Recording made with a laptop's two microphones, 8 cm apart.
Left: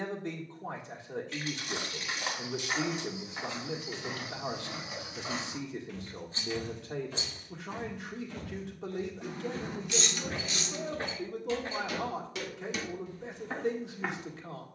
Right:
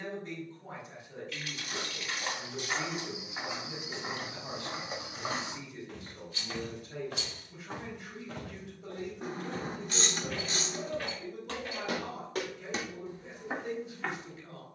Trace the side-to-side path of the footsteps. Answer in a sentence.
You can hear the footsteps go right and come back.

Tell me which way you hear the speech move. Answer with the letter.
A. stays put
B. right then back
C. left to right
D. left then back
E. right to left
A.